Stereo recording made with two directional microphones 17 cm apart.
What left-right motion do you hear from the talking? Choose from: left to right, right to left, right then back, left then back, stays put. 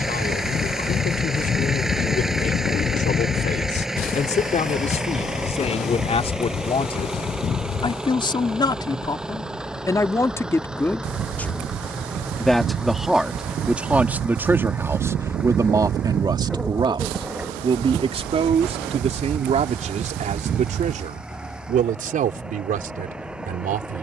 left to right.